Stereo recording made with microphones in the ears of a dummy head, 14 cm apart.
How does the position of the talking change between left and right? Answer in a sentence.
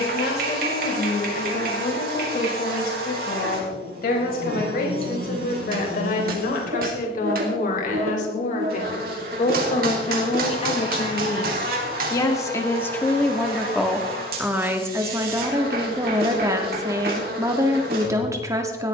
In this clip you hear the talking travel towards the right.